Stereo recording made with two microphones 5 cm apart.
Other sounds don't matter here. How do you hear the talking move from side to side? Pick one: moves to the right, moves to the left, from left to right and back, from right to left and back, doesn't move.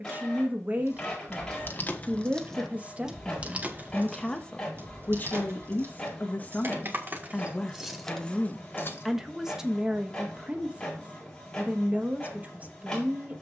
from right to left and back.